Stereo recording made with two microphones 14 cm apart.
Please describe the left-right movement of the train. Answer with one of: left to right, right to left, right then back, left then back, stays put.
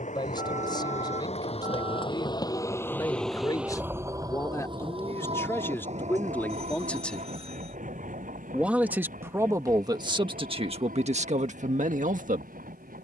left to right.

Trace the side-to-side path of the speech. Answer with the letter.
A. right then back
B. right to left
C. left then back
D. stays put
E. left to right
E.